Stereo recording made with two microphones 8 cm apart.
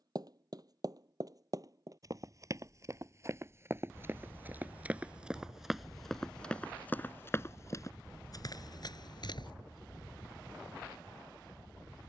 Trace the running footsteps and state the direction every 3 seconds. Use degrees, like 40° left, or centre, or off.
40° right, 20° right, 30° left, 60° left.